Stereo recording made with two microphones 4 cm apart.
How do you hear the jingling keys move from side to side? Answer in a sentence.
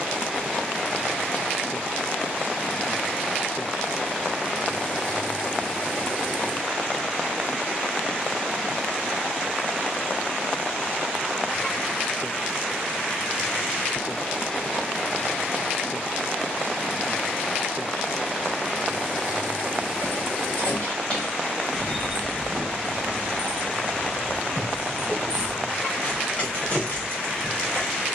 You can hear the jingling keys go right and come back.